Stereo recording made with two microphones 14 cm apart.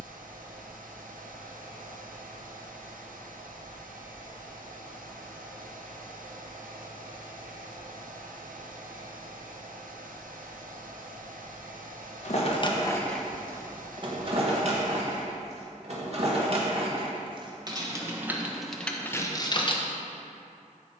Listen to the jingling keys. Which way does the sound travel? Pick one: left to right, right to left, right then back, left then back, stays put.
right then back.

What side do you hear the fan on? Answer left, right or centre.
right.